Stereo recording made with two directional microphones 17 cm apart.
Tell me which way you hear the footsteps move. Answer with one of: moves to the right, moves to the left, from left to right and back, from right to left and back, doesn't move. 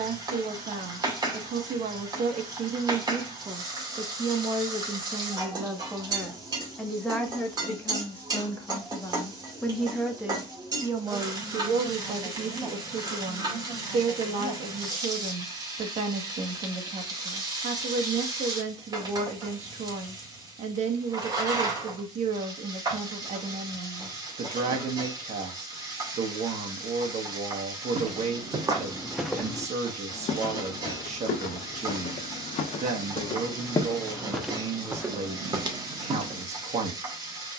from right to left and back.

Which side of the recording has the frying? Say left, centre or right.
right.